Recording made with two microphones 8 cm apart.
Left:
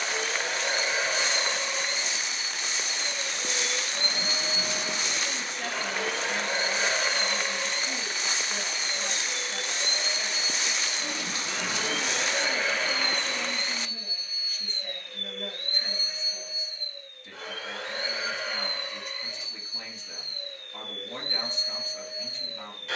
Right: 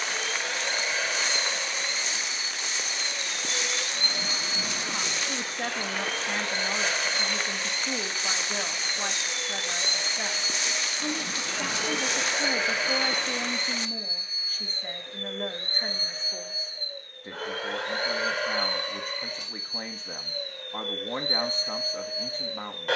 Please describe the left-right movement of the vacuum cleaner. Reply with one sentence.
You can hear the vacuum cleaner travel towards the right.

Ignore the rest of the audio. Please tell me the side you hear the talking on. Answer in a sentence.
In this clip you hear the talking on the right.